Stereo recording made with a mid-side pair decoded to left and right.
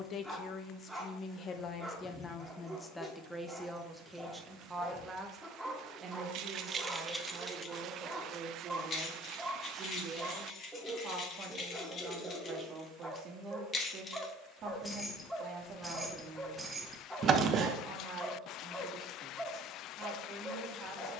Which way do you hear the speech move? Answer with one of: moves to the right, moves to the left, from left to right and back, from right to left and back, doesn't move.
moves to the right.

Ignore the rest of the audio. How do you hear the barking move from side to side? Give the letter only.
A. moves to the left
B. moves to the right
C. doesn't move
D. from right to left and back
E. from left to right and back
C.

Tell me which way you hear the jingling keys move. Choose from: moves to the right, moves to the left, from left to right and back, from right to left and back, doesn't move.
from right to left and back.